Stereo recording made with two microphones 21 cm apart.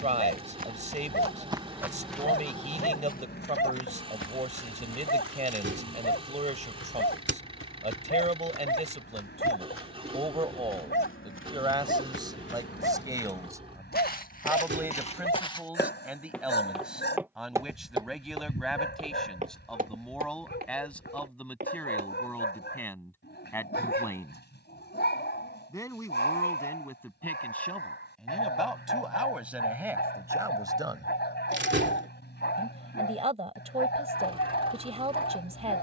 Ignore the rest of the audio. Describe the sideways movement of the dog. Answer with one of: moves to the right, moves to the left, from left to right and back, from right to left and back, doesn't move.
doesn't move.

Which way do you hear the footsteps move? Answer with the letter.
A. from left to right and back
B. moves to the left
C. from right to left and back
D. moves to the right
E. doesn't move
C.